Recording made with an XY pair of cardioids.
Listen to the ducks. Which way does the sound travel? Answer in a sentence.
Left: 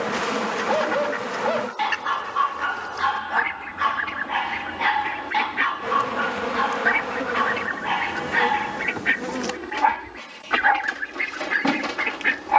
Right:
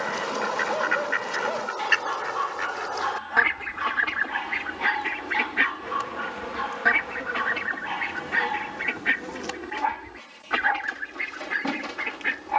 You can hear the ducks go from the right side to the left.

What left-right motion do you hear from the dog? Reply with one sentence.
You can hear the dog stay put.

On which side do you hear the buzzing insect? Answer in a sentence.
In this clip you hear the buzzing insect on the left.